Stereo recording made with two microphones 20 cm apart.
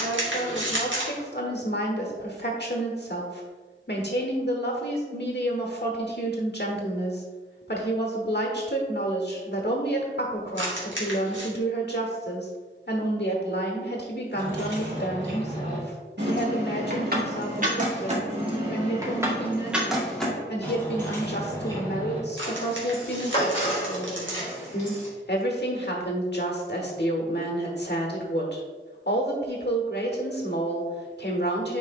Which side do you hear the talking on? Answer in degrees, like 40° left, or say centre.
60° left.